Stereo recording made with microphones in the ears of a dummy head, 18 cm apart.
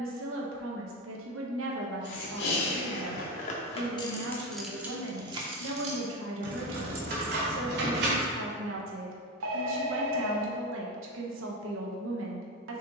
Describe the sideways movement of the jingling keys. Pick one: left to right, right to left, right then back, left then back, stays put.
left to right.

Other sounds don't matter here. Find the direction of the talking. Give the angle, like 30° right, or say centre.
70° right.